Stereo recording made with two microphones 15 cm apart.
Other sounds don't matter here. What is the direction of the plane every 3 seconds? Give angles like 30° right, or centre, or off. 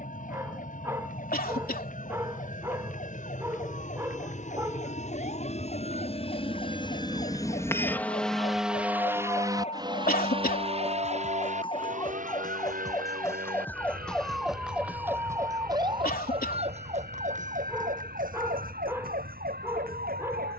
70° left, 60° left, 20° left, 30° right, 60° right, 70° right, 70° right.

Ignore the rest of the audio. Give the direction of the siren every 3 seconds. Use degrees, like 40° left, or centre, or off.
60° left, 60° left, 50° left, 40° left, 10° left, 40° right, 70° right.